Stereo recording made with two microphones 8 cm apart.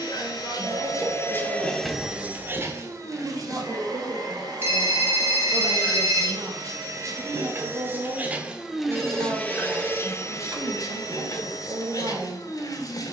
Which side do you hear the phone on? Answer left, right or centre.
right.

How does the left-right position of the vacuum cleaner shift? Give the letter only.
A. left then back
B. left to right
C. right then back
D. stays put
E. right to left
C.